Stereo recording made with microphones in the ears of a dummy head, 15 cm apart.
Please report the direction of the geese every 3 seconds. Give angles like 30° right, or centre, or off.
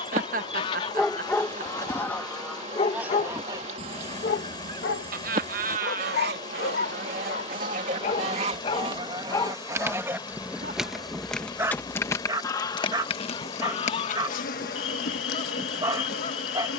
20° left, 40° right, 50° right, 10° right, 30° left, 40° left.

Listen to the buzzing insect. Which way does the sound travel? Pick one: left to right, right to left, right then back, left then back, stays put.
right to left.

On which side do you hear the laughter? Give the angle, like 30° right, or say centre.
50° right.